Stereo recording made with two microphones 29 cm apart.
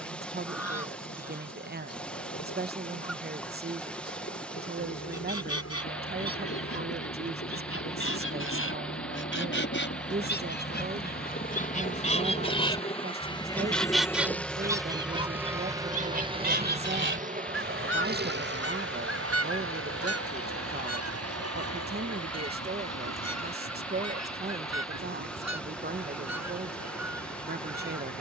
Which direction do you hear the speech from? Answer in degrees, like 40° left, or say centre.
40° right.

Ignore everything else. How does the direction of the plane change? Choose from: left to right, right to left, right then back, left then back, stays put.
left to right.